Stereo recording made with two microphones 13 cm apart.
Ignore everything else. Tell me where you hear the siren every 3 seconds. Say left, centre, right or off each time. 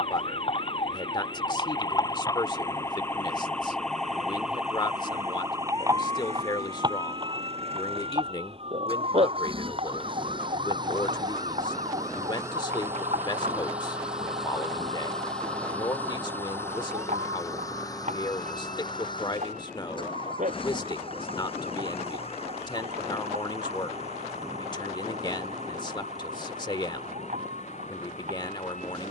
left, centre, right, right, right, right, right, right, right, right.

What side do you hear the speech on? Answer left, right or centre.
left.